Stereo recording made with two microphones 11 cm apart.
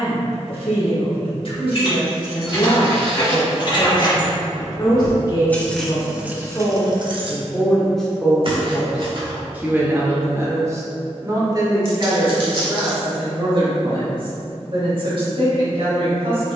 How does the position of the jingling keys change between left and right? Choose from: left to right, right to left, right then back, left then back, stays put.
left to right.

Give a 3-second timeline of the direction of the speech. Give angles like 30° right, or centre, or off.
60° left, 40° left, 10° left, 30° right, 50° right, 60° right.